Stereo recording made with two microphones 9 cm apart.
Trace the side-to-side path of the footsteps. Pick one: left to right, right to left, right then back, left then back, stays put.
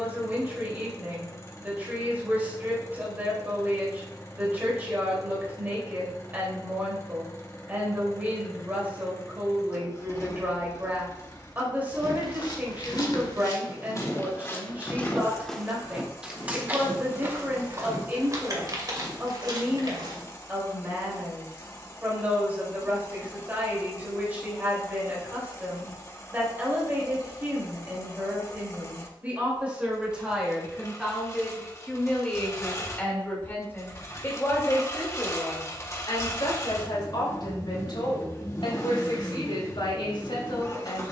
left to right.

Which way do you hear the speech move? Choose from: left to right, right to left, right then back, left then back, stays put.
right to left.